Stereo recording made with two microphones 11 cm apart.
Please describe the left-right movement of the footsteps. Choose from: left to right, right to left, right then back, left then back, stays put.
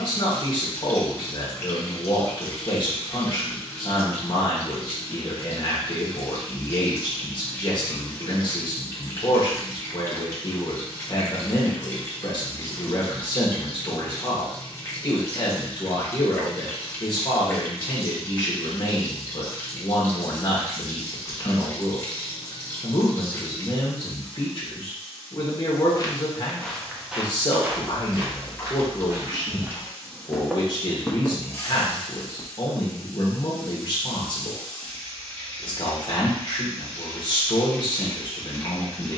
right then back.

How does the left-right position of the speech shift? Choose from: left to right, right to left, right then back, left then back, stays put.
stays put.